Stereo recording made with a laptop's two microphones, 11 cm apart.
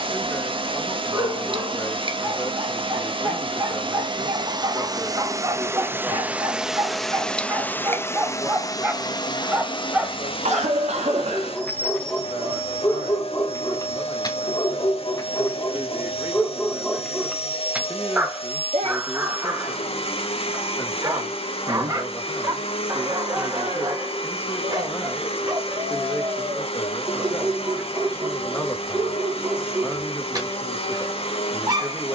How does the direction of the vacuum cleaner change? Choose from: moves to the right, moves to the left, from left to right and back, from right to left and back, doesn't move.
moves to the left.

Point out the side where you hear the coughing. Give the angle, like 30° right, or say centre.
80° right.